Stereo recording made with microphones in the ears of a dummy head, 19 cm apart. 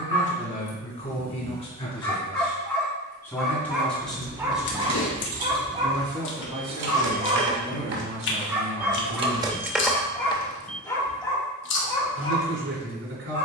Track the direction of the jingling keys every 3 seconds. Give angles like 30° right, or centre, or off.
off, 70° right, 50° right, 10° left, off.